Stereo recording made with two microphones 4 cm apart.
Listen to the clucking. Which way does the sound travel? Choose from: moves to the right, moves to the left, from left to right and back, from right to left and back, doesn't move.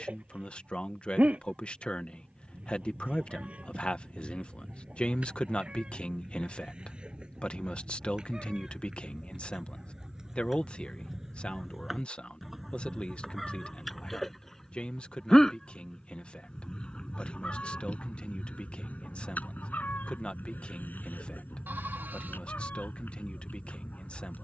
moves to the left.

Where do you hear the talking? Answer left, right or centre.
left.